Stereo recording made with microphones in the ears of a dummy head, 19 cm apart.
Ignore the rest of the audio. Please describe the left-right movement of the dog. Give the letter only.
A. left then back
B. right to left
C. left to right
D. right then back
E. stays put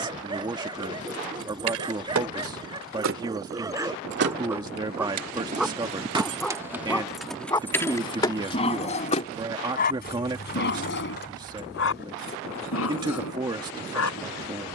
B.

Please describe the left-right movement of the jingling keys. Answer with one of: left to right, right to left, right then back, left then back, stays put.
right to left.